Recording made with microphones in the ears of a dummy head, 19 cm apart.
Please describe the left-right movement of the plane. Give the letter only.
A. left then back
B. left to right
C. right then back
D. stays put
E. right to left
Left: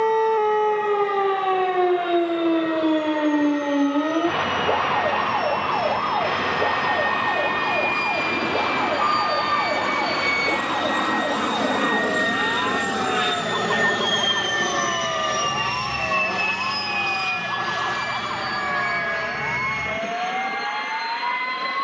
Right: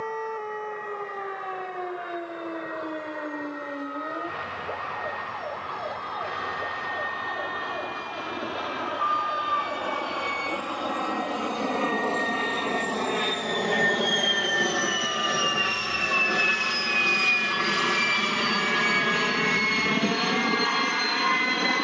B.